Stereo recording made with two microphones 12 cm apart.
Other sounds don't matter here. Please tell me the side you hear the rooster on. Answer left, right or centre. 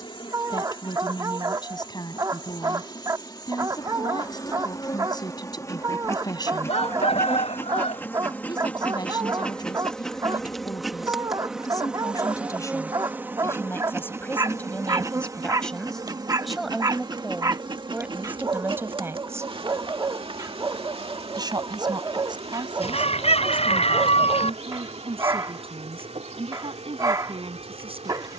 left.